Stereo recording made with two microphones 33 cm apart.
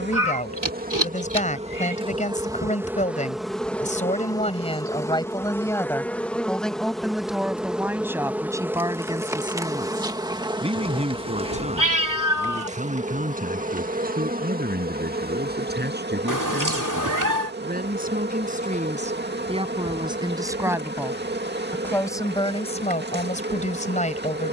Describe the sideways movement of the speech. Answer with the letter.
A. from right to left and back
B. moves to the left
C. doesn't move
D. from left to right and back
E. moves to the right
D.